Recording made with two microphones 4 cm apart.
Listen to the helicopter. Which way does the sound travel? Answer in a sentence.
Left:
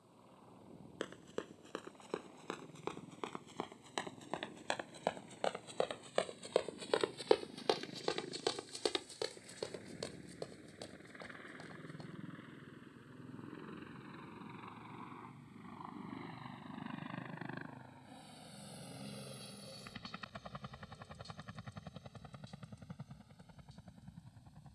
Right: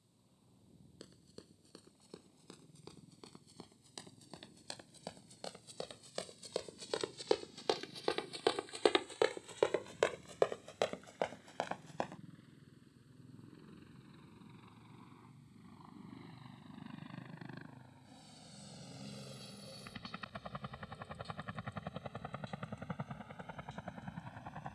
In this clip you hear the helicopter go from the left side to the right.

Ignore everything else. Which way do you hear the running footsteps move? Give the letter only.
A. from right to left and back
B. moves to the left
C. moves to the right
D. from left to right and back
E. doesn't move
C.